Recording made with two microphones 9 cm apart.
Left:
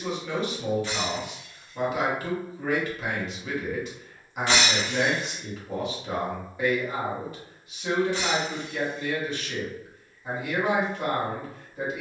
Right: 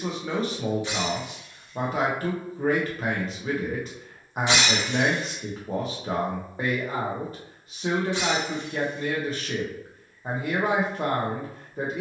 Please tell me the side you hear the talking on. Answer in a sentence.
In this clip you hear the talking on the right.